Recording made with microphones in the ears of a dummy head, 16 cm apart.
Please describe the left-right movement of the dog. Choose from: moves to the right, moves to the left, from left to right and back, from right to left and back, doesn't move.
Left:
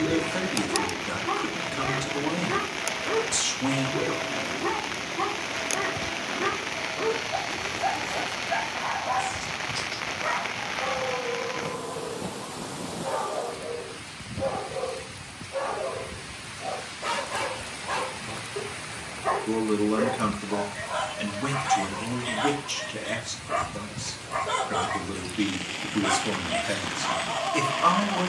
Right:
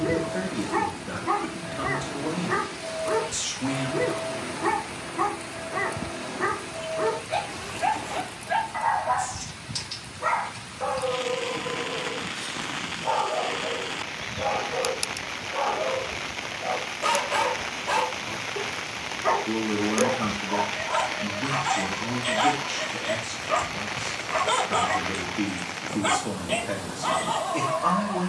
doesn't move.